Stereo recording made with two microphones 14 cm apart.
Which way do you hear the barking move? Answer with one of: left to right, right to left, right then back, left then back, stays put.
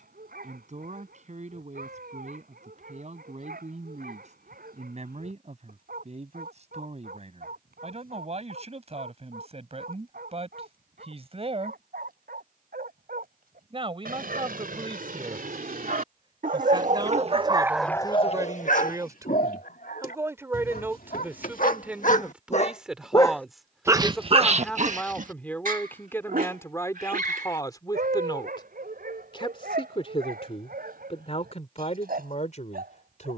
left then back.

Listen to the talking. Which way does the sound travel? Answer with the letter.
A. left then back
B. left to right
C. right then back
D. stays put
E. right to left
E.